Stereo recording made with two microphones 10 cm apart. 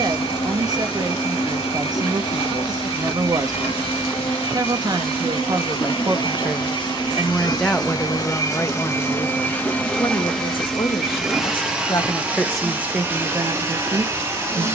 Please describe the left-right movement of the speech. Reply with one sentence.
You can hear the speech move from right to left and back again.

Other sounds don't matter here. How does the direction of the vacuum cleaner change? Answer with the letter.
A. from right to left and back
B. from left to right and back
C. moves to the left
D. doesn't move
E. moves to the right
E.